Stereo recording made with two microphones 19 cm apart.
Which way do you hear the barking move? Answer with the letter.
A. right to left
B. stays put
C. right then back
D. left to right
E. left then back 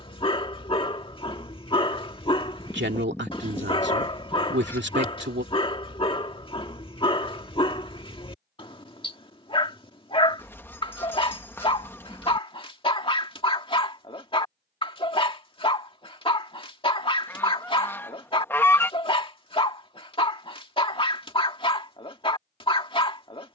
B.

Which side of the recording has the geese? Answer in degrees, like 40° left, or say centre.
10° left.